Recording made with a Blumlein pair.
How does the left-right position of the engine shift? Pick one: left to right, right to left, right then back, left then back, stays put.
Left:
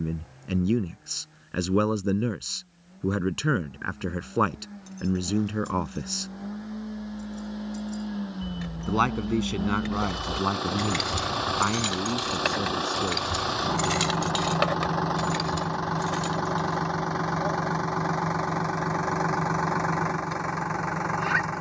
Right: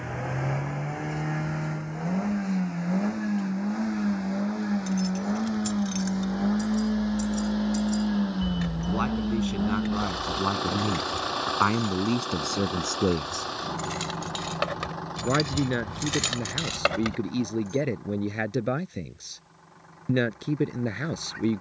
right to left.